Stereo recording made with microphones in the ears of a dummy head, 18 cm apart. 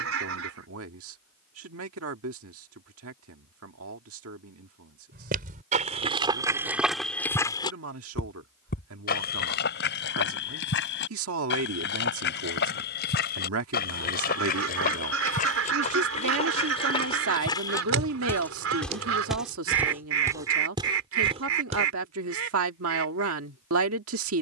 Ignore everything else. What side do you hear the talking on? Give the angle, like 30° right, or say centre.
80° right.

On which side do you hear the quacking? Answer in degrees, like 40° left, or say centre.
70° right.